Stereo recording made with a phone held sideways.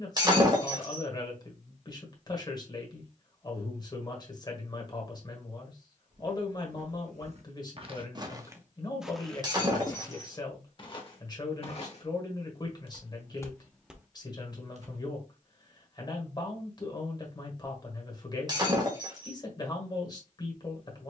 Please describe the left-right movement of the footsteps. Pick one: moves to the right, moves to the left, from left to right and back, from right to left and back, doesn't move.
from right to left and back.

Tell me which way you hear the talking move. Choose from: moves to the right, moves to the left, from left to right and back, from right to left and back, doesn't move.
doesn't move.